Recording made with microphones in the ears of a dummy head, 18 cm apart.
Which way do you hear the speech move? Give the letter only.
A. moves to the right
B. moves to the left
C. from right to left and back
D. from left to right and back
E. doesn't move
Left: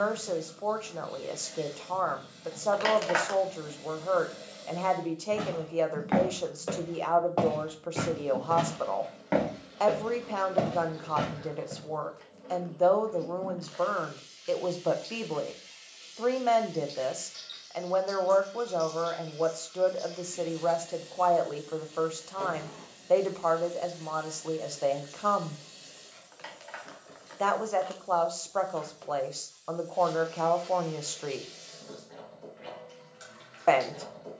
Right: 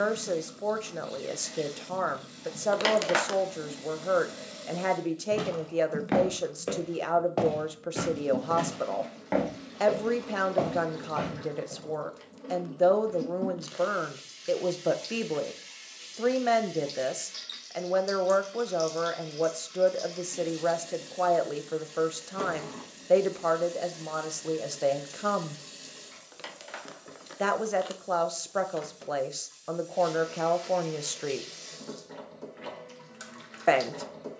E.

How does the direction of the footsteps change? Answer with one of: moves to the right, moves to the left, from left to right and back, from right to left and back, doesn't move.
moves to the left.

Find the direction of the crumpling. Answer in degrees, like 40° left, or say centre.
40° right.